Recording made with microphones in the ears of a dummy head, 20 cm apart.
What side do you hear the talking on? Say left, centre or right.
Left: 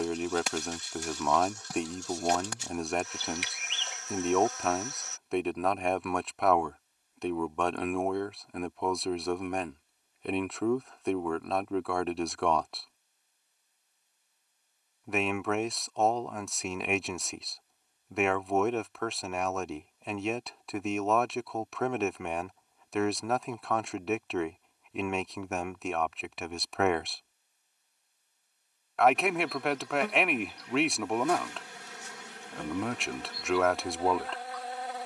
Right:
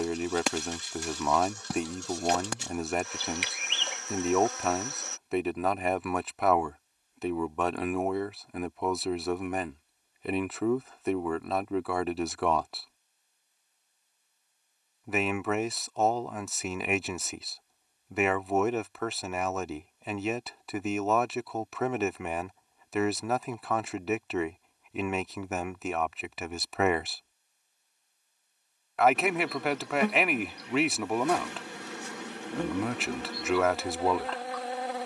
centre.